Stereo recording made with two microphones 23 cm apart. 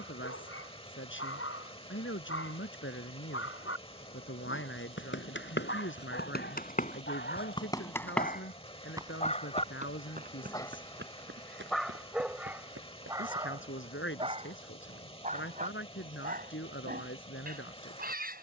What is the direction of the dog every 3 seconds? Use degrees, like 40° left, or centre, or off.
70° left, 60° left, 50° left, 10° left, 20° right, 40° right.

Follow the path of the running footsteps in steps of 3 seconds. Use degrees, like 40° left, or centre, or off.
off, 60° left, 20° left, 40° right, 60° right, off.